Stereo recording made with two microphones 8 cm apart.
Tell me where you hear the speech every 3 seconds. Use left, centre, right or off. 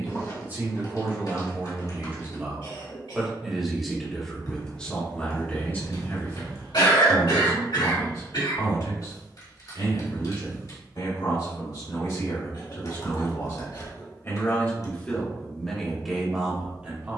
right, centre, left, left, left, centre.